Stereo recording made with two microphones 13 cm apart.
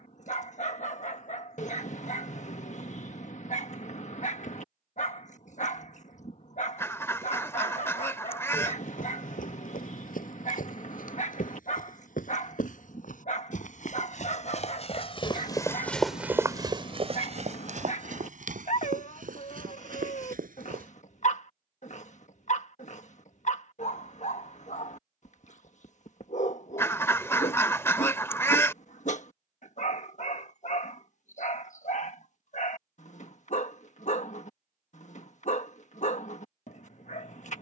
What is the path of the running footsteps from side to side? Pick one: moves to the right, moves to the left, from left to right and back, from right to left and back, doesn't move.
moves to the right.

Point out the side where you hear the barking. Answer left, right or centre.
left.